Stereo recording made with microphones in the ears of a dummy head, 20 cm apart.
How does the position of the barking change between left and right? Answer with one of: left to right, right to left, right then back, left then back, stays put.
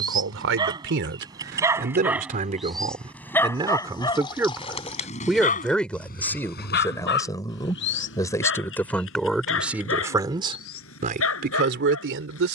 right to left.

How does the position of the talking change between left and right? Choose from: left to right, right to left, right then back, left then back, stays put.
left then back.